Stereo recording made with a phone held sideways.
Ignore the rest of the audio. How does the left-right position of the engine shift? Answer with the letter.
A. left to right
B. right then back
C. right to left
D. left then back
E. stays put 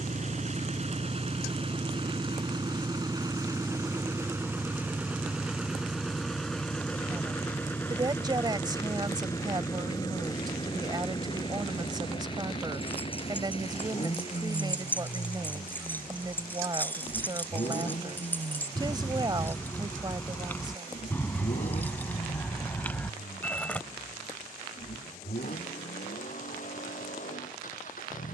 C.